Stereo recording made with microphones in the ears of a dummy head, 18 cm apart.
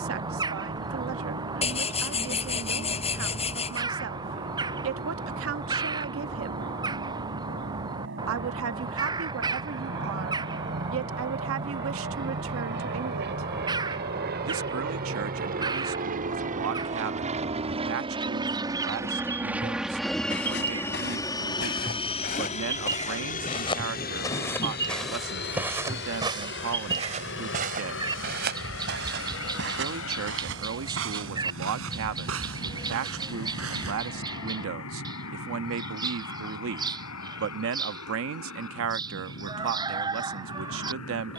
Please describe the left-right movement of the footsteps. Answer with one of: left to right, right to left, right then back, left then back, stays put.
left to right.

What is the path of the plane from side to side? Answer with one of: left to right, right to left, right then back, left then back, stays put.
right to left.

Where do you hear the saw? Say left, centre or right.
left.